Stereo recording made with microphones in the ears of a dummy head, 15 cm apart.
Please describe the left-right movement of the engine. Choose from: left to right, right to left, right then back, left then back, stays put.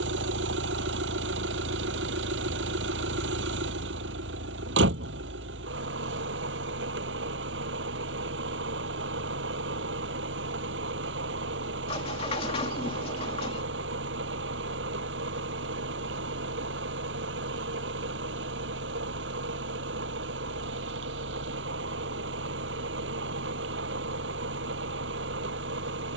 stays put.